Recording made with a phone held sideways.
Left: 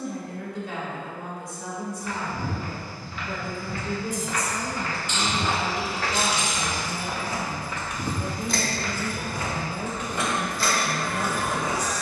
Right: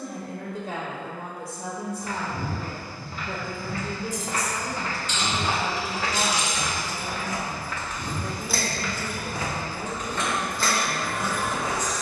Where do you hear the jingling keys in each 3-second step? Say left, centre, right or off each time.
off, left, left, right.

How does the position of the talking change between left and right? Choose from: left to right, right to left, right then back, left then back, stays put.
right to left.